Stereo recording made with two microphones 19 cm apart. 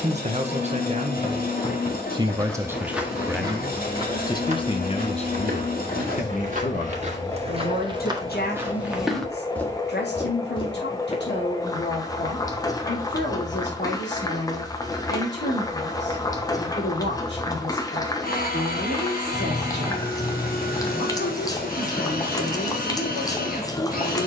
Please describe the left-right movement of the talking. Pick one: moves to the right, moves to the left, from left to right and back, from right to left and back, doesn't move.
moves to the left.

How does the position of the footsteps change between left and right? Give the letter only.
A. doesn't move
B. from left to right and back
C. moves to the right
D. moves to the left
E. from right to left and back
B.